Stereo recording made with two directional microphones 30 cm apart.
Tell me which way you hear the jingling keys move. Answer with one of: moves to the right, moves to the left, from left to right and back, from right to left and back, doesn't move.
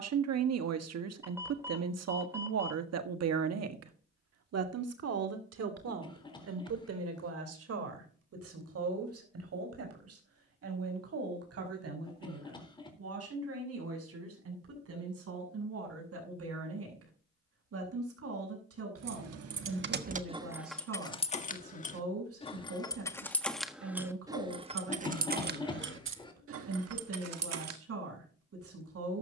from right to left and back.